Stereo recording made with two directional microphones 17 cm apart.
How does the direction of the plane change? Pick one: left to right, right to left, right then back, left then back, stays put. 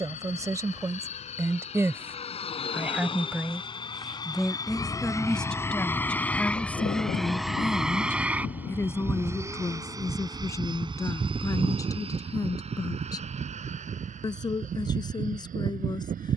left to right.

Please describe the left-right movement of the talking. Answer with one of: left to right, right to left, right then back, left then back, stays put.
right to left.